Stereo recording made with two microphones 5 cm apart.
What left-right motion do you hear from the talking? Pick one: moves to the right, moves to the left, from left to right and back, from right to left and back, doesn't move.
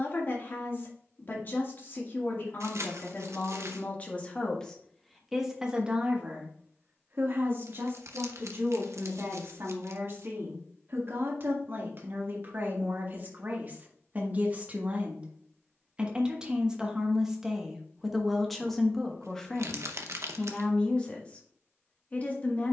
from left to right and back.